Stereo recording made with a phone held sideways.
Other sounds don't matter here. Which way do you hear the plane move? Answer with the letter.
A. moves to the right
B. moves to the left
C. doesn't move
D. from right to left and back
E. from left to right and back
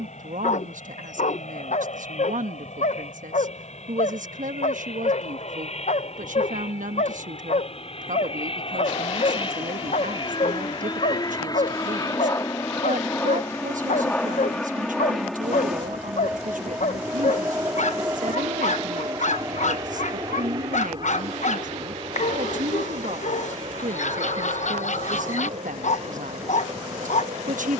A.